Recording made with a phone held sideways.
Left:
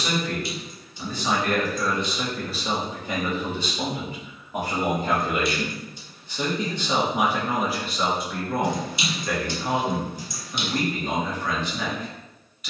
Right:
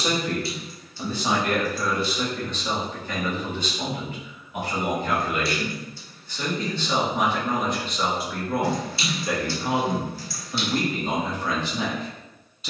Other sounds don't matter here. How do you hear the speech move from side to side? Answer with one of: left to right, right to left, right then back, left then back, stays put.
left then back.